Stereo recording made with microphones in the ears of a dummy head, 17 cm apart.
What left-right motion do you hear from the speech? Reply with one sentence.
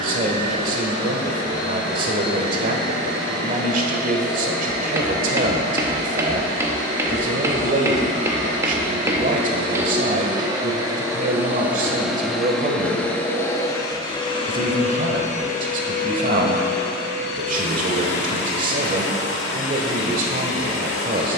You can hear the speech stay in one place.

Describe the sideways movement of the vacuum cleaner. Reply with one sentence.
You can hear the vacuum cleaner move to the left.